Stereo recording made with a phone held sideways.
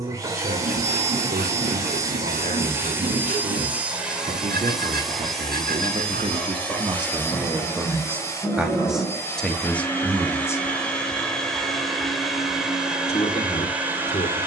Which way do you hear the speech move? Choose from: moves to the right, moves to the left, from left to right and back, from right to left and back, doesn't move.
moves to the left.